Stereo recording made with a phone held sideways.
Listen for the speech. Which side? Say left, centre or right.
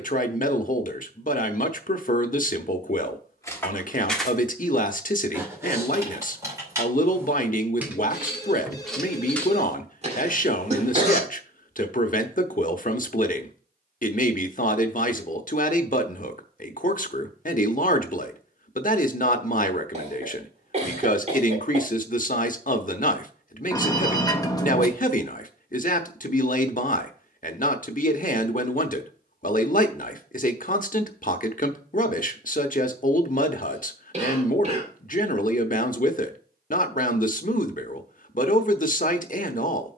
left.